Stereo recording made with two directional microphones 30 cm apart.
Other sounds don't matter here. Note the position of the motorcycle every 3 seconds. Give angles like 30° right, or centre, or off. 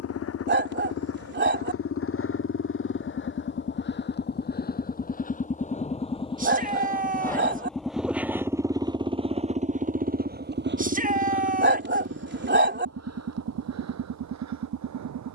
50° left, 30° left, centre, 30° right, 60° right.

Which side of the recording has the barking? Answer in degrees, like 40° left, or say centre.
40° right.